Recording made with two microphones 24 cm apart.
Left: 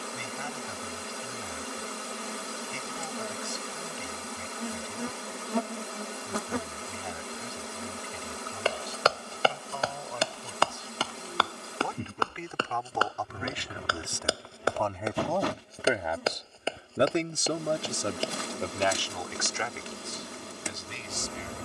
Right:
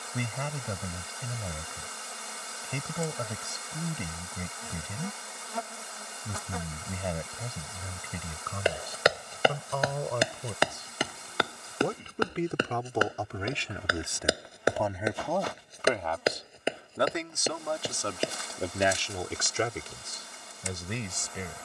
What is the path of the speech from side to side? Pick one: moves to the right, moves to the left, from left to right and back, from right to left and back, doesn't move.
from right to left and back.